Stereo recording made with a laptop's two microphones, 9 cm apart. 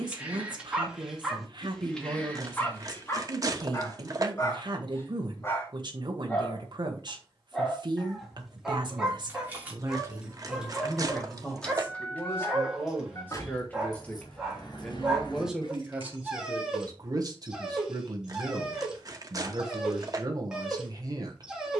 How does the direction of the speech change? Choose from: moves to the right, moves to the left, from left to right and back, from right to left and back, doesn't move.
from right to left and back.